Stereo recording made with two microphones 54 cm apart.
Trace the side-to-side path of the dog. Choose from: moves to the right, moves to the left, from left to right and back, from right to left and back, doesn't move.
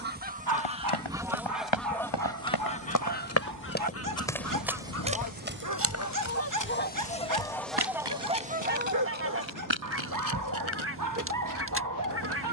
doesn't move.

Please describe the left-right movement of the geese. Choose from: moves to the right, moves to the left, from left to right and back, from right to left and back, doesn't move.
from right to left and back.